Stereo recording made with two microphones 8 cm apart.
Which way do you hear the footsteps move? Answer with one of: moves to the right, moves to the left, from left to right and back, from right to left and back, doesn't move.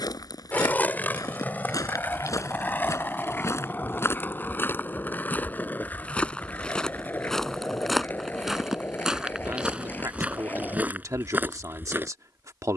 moves to the right.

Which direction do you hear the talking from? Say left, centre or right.
right.